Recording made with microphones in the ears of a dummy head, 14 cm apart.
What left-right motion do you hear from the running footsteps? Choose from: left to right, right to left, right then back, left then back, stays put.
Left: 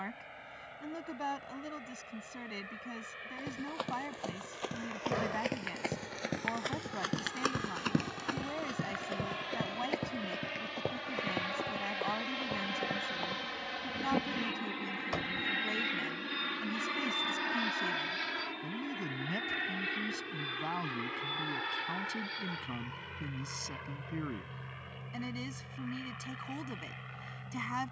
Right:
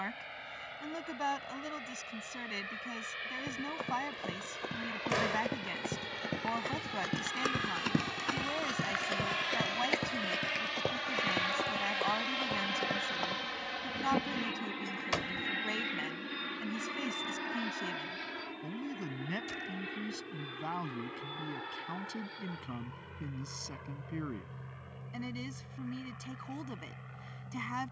left to right.